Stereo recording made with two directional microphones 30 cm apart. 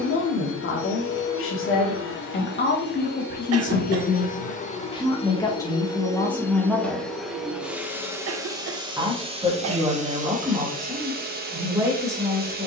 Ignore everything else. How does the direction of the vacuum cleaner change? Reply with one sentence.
You can hear the vacuum cleaner travel towards the right.